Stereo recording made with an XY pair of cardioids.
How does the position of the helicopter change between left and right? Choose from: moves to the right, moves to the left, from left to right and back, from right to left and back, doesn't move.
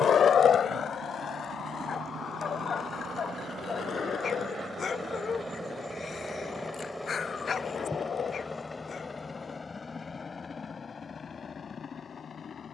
moves to the left.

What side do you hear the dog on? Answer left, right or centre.
left.